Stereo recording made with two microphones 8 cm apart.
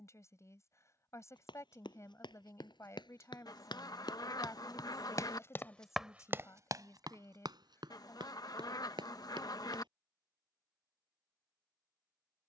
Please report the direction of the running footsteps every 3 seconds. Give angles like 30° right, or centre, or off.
80° left, 60° left, 60° right, 80° right.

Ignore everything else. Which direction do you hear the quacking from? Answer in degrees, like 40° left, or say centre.
50° left.